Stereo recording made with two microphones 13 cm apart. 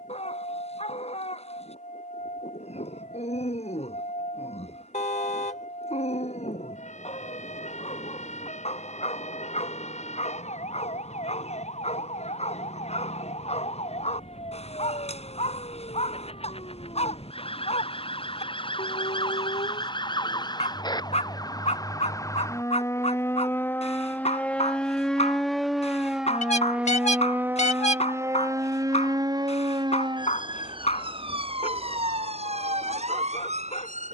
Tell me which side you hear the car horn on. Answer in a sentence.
You can hear the car horn on the left.